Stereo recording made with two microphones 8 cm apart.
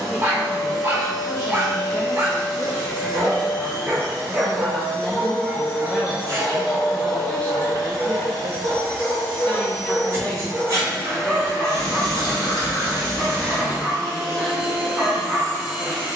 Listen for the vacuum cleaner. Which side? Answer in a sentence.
You can hear the vacuum cleaner on the right.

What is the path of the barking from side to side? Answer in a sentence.
In this clip you hear the barking go left and come back.